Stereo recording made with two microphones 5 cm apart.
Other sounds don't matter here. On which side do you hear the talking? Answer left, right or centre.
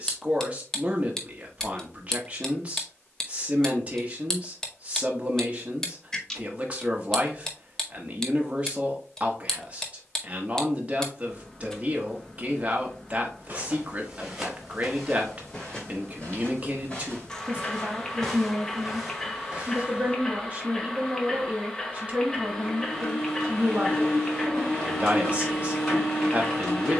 right.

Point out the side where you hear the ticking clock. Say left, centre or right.
centre.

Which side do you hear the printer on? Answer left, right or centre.
centre.